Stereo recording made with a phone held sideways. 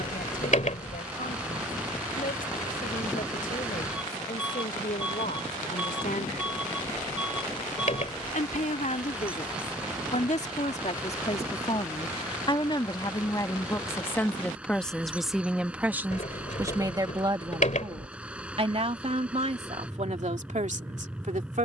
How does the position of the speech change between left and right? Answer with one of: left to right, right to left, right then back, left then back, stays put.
left to right.